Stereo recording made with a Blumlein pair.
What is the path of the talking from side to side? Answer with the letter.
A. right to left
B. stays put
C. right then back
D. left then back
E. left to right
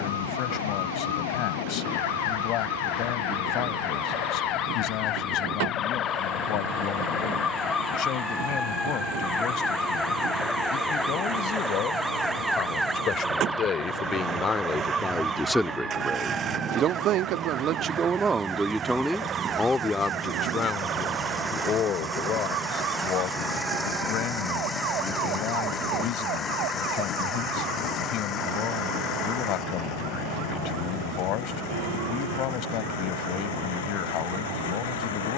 C.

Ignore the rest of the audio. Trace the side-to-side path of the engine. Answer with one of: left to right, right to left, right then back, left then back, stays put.
right to left.